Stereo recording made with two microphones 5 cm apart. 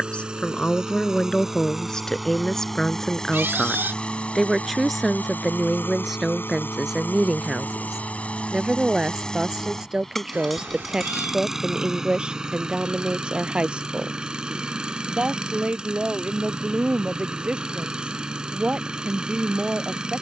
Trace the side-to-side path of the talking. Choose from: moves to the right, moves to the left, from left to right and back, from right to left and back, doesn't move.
moves to the right.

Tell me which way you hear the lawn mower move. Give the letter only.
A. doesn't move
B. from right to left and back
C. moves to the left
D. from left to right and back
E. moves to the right
B.